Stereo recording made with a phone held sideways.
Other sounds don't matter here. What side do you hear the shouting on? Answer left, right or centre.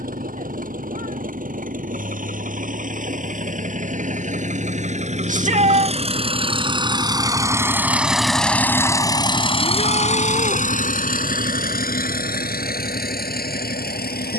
right.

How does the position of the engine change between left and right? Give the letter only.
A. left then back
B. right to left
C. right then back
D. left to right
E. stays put
B.